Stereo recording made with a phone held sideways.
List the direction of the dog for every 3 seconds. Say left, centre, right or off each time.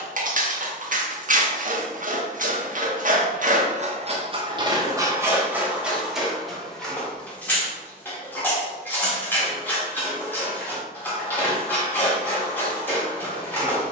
right, right, centre, centre, centre.